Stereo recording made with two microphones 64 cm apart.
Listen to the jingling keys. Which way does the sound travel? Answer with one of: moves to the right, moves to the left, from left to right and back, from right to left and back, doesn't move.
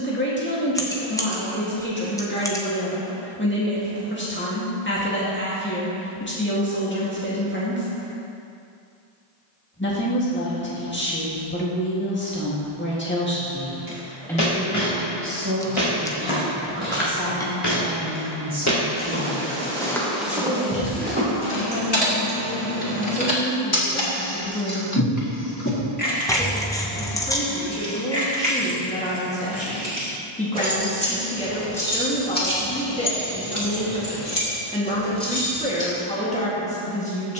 from left to right and back.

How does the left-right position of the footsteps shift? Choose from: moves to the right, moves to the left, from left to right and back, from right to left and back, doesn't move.
moves to the right.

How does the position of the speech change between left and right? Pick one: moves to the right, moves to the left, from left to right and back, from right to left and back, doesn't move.
from left to right and back.